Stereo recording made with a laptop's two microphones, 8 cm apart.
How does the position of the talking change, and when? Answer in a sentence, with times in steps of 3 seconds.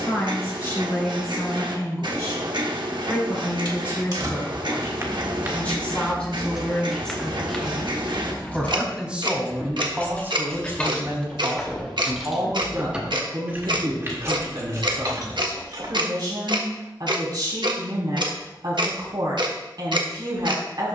In this clip you hear the talking on the left from 0 s, in the centre from 6 s and on the right from 9 s.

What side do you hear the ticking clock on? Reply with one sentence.
You can hear the ticking clock on the right.